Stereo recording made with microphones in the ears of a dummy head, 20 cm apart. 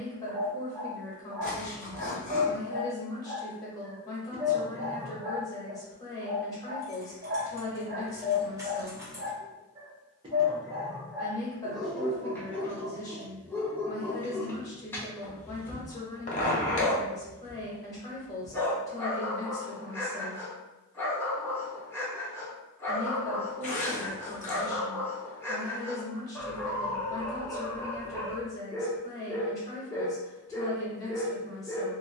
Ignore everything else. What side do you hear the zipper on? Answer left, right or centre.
left.